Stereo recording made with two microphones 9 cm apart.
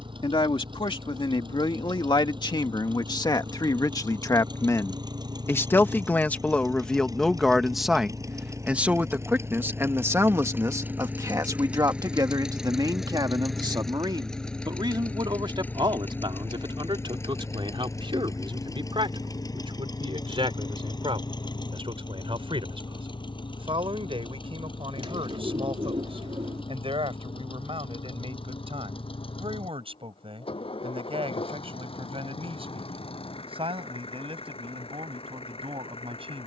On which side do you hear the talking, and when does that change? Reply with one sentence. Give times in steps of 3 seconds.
In this clip you hear the talking on the left from 0 s, in the centre from 6 s and on the right from 9 s.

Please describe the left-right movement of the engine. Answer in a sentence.
In this clip you hear the engine go from the right side to the left.